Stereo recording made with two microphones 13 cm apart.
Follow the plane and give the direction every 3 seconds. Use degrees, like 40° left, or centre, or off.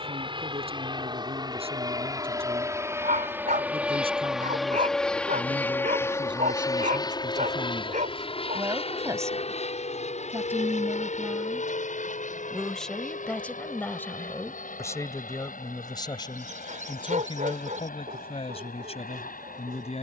30° right, centre, 30° left, 60° left, 70° left, 70° left, 80° left.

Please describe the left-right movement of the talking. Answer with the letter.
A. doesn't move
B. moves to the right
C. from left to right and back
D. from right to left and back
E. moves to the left
E.